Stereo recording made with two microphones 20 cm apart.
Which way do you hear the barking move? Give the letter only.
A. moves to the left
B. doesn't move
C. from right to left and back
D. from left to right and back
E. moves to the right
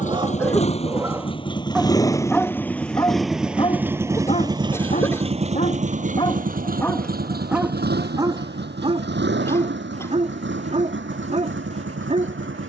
C.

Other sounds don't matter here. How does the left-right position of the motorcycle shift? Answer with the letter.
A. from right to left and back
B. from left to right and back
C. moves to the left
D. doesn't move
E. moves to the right
E.